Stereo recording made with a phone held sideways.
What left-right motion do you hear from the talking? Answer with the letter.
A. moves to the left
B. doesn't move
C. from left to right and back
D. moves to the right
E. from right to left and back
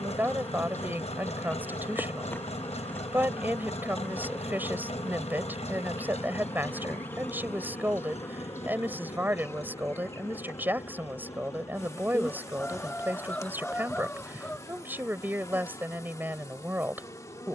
B.